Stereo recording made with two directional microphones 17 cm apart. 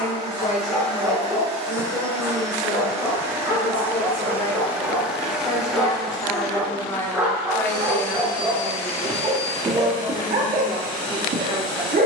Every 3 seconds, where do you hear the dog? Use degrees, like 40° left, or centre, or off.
20° left, 10° left, 10° right, 40° right.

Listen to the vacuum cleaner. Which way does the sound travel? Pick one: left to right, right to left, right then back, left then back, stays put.
right to left.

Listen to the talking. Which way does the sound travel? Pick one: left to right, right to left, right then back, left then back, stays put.
left to right.